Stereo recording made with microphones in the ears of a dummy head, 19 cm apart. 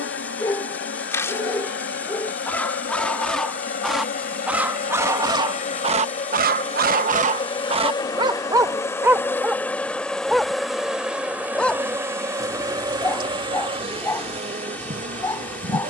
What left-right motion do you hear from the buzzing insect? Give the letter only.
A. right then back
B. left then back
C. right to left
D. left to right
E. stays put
D.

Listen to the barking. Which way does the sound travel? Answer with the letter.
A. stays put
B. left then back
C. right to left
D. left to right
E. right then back
E.